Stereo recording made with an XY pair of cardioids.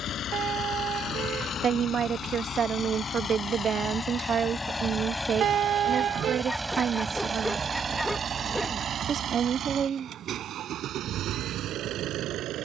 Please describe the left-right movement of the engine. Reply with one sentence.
In this clip you hear the engine move from left to right.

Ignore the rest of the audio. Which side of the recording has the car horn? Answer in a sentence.
In this clip you hear the car horn on the right.